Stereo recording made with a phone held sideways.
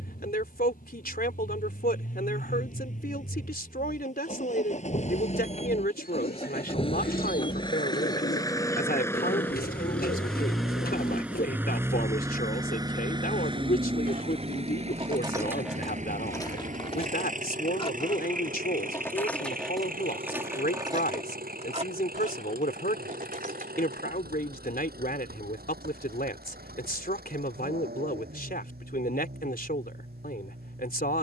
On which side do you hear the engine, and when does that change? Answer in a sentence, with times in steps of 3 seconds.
You can hear the engine on the left from 0 s, in the centre from 9 s and on the right from 12 s.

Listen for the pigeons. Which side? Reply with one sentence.
In this clip you hear the pigeons on the left.